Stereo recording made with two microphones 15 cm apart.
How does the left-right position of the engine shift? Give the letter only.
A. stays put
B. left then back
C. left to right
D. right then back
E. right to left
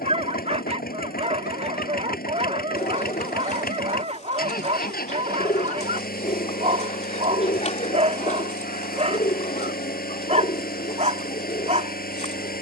A.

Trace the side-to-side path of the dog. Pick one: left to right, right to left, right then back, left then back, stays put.
stays put.